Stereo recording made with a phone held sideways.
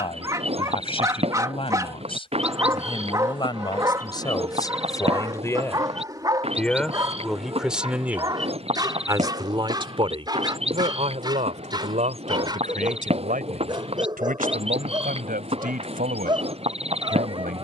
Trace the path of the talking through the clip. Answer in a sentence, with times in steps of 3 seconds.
In this clip you hear the talking on the left from 0 s, in the centre from 6 s and on the right from 9 s.